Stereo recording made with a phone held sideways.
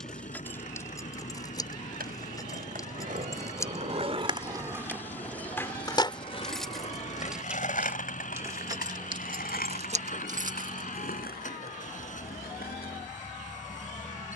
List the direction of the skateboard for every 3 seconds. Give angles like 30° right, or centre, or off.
60° right, 20° right, 50° left, 70° left, 70° left.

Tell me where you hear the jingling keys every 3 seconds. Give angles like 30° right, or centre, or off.
20° left, 20° left, 10° right, 40° right, off.